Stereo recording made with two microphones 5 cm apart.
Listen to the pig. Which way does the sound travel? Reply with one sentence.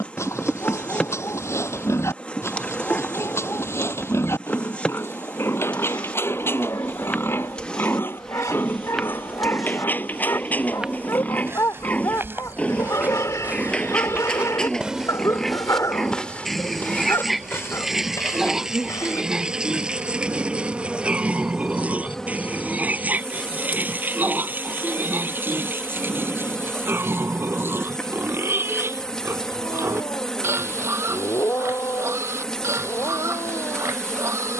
You can hear the pig go from the left side to the right.